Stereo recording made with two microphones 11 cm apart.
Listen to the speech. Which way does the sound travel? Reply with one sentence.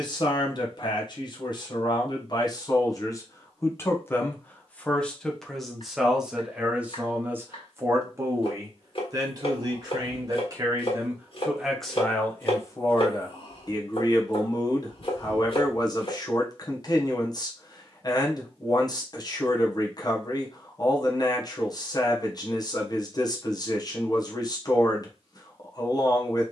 You can hear the speech move from left to right and back again.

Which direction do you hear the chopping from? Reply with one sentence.
You can hear the chopping on the left.